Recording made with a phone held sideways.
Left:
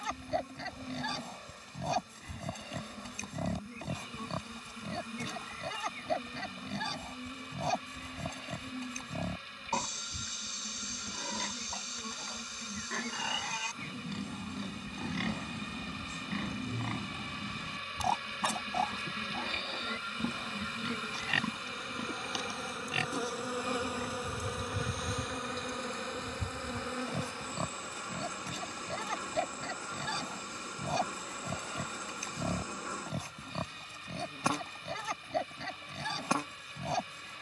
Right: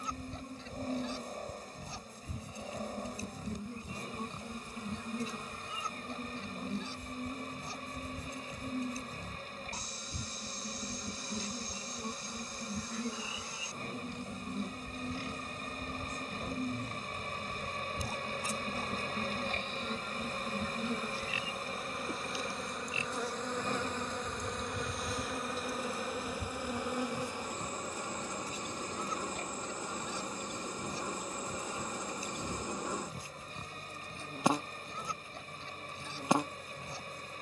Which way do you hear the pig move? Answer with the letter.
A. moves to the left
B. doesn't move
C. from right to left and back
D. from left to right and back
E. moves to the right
B.